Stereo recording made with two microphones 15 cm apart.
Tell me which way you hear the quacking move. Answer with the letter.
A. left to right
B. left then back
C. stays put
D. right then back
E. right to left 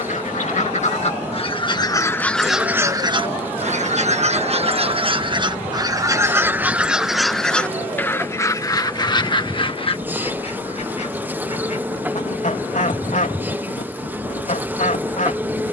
D.